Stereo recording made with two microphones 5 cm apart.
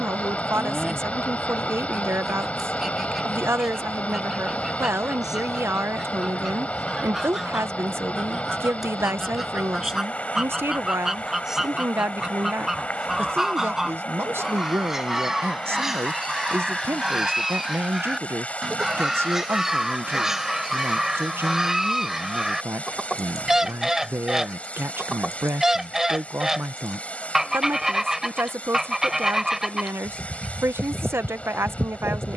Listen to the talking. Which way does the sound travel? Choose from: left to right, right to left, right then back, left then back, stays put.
stays put.